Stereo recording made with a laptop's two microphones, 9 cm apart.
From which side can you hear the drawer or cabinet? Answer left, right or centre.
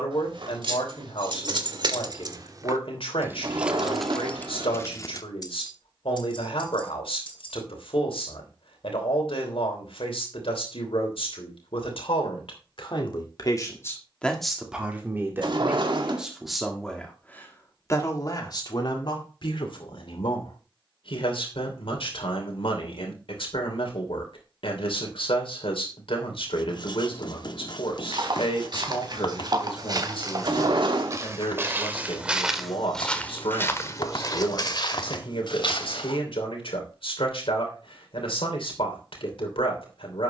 right.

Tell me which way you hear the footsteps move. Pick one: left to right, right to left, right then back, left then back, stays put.
right to left.